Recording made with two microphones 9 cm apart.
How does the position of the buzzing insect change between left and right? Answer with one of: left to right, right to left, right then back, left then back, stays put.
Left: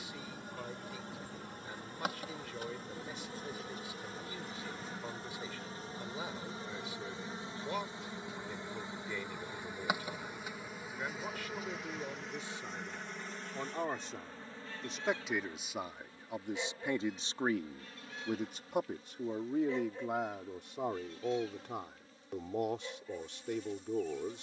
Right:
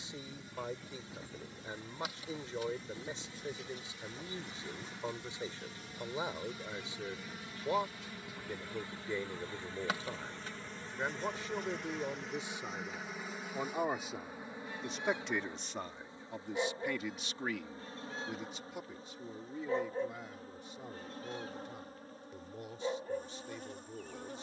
left to right.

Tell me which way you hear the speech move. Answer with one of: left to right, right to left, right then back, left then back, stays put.
right to left.